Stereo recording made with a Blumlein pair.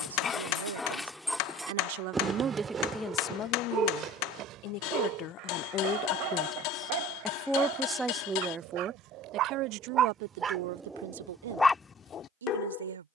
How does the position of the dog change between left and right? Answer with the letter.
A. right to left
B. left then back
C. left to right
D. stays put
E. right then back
E.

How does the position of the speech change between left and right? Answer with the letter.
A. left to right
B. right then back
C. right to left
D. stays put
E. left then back
E.